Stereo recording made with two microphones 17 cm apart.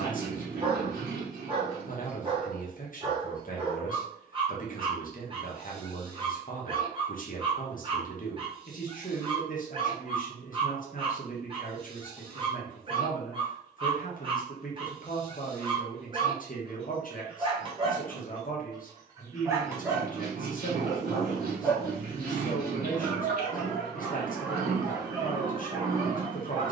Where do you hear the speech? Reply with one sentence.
You can hear the speech on the left.